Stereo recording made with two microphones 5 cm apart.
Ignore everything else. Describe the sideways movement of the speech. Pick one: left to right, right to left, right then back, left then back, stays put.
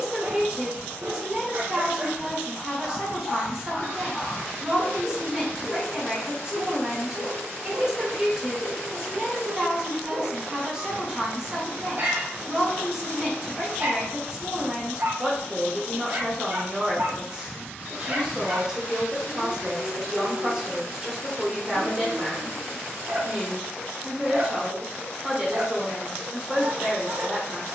stays put.